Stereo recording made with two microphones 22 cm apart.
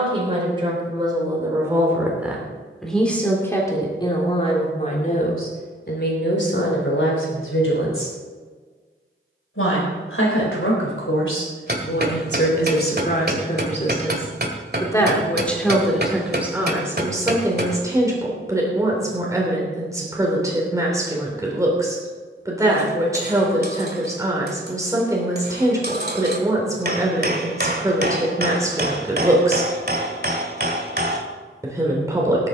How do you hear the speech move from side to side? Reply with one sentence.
In this clip you hear the speech go left and come back.